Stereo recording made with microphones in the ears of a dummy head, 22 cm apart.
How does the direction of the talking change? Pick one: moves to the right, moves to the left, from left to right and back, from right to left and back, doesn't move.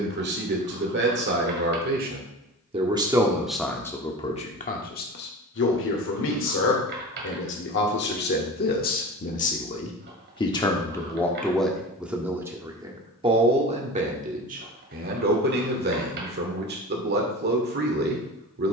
from right to left and back.